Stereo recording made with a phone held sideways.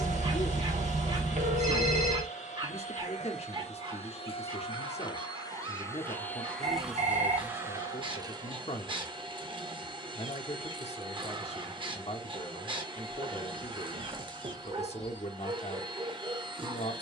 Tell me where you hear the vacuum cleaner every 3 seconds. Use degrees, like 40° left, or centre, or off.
60° left, 40° left, 10° right, 30° right, 30° right, 30° right.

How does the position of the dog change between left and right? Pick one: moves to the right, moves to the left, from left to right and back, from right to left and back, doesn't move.
doesn't move.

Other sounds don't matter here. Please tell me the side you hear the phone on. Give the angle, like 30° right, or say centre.
60° right.